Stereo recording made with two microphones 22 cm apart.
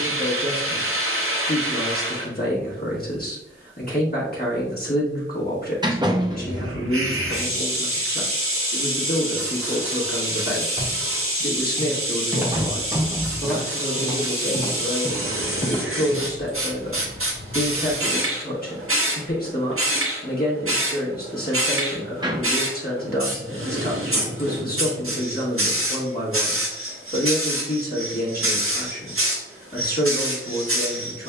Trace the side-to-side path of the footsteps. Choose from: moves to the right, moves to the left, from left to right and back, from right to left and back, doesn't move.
moves to the left.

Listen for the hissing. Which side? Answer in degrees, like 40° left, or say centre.
70° right.